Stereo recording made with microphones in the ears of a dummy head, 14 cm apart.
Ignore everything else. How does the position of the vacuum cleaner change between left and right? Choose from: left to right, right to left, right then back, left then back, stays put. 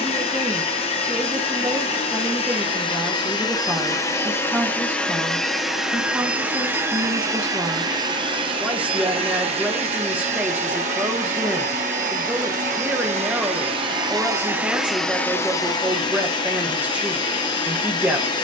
right then back.